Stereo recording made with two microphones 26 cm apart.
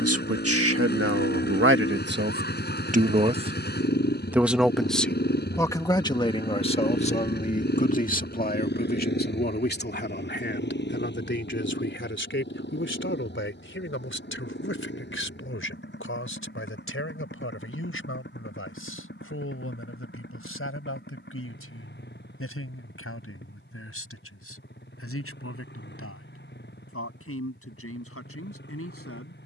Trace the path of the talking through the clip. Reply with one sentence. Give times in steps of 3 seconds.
In this clip you hear the talking on the right from 0 s, in the centre from 3 s and on the left from 6 s.